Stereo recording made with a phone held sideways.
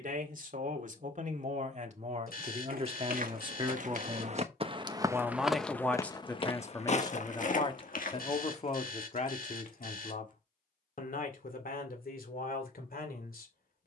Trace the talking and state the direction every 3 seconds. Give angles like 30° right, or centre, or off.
50° right, 20° right, 30° left, 60° left, 70° left.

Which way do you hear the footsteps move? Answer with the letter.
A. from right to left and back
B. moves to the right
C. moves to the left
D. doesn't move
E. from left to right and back
C.